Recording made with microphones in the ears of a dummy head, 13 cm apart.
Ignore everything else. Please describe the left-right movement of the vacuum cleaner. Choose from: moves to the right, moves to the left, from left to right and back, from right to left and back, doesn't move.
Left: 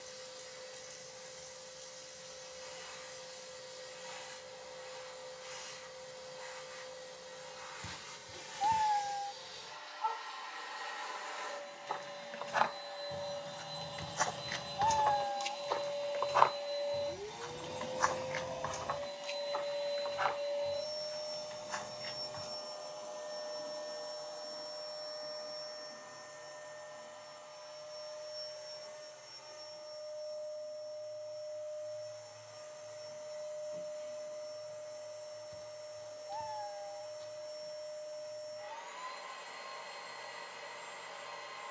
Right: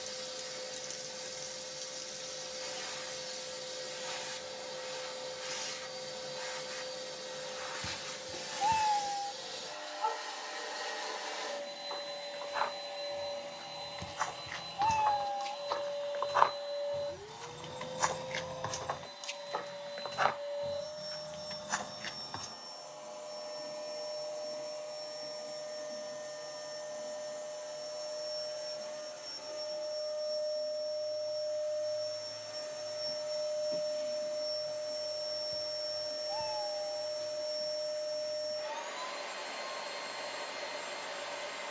from right to left and back.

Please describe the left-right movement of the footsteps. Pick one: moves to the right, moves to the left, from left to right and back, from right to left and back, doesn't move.
moves to the right.